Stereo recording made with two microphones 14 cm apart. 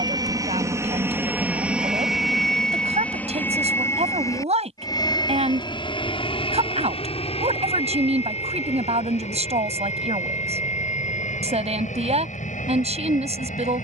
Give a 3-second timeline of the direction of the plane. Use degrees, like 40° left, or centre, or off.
10° right, 20° left, 40° left, 50° left, 60° left.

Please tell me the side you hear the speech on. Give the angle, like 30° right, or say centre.
50° right.